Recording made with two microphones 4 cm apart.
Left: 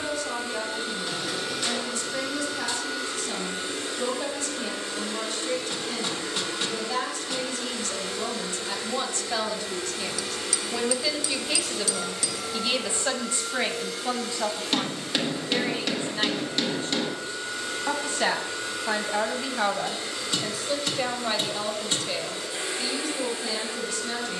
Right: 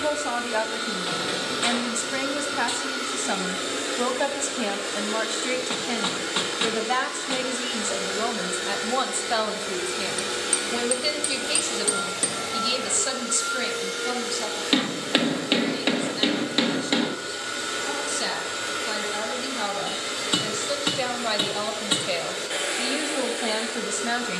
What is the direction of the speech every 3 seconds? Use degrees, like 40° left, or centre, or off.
50° right, 50° right, 40° right, 10° right, 20° left, 40° left, 20° left, 30° right.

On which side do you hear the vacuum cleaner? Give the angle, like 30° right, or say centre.
70° right.